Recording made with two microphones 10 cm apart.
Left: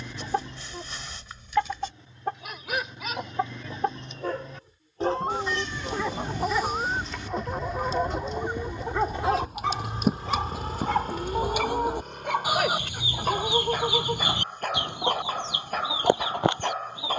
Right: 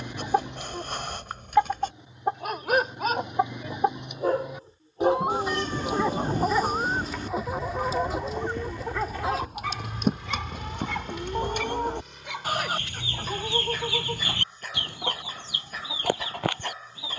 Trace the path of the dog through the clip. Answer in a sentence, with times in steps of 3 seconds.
You can hear the dog on the right from 0 s, in the centre from 6 s and on the left from 9 s.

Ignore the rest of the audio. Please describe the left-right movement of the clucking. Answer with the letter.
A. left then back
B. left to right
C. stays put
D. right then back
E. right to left
E.